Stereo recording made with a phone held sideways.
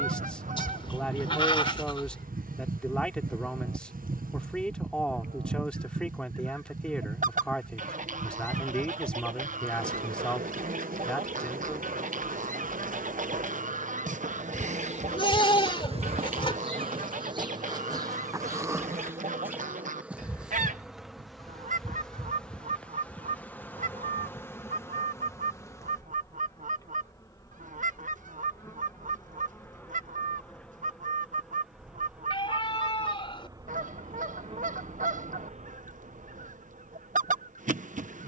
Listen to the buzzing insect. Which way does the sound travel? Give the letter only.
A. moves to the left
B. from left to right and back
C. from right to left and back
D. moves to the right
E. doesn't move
C.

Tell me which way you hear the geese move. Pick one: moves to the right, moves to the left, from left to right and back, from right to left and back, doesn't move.
doesn't move.